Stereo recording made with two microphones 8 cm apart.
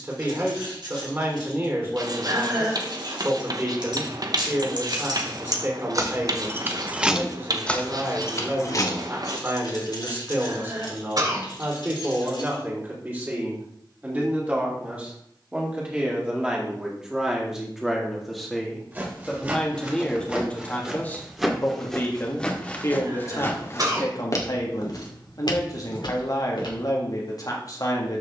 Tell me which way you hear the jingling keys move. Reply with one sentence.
In this clip you hear the jingling keys move to the left.